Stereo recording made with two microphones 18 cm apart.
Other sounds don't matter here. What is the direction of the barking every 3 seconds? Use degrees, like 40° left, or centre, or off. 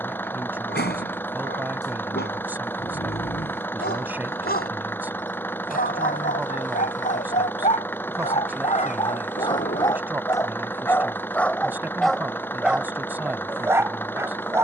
70° left, 60° left, 40° left, 20° left, 10° right.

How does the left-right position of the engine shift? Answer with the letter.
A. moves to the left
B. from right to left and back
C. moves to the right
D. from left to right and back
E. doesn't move
E.